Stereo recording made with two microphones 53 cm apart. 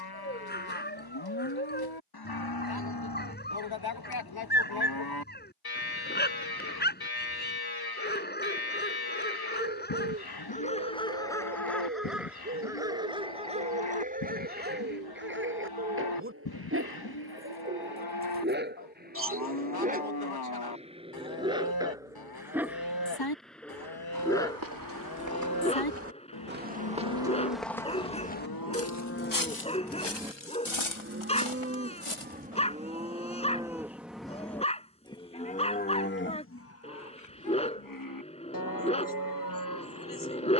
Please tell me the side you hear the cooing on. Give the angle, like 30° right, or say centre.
20° right.